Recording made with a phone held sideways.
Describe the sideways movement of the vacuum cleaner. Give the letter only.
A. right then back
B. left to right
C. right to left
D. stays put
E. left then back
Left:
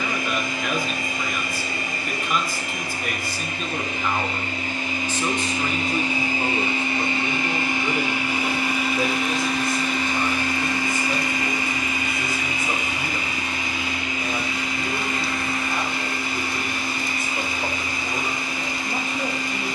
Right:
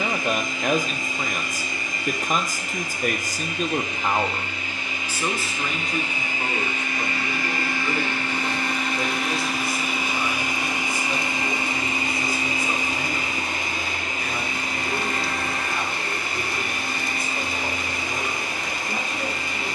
B.